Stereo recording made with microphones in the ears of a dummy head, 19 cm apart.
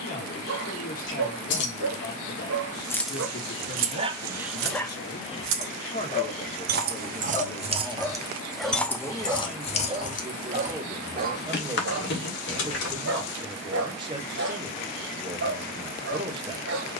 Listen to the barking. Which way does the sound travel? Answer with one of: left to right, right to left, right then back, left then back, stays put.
left then back.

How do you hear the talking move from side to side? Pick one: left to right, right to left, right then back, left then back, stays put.
left to right.